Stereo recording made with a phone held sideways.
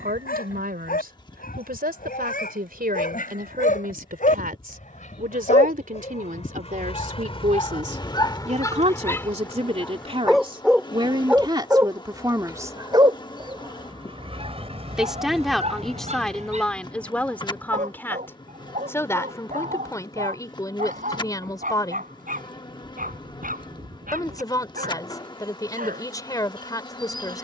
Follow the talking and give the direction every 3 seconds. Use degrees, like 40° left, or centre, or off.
80° right, 70° right, 60° right, 40° right, 20° right, 10° left, 20° left, 20° left, 20° left.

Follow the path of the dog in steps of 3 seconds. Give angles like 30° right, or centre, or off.
70° left, 60° left, 30° left, centre, 30° right, 50° right, 60° right, 60° right, 70° right.